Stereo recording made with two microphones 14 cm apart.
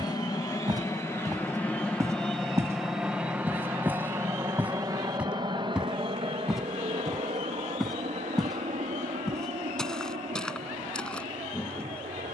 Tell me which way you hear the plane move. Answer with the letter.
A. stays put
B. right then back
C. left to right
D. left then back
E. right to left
C.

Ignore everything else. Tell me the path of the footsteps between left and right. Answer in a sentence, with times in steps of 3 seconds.
You can hear the footsteps on the right from 0 s and in the centre from 3 s.